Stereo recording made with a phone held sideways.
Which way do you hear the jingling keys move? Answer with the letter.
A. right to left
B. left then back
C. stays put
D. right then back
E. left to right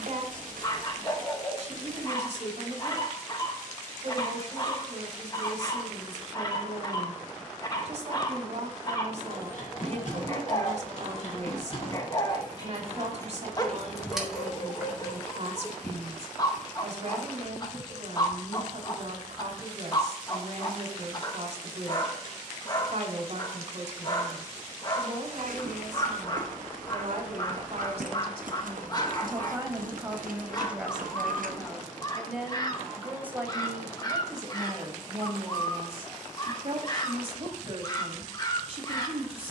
E.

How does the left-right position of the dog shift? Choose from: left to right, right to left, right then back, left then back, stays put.
stays put.